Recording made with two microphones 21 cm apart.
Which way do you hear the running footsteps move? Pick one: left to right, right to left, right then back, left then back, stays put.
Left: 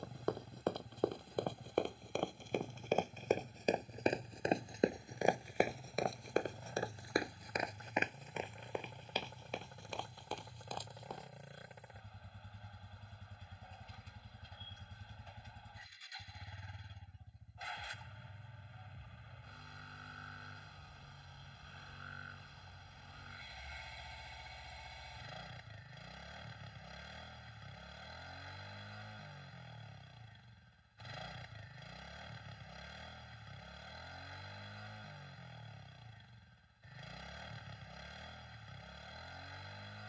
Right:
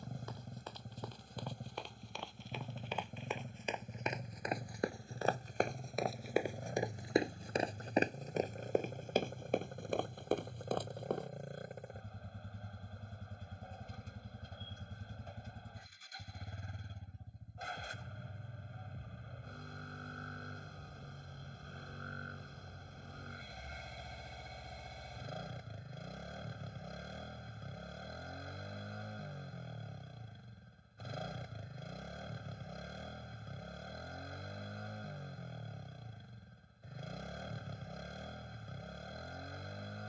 left to right.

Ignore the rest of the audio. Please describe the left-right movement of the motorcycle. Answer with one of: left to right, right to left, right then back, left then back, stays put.
stays put.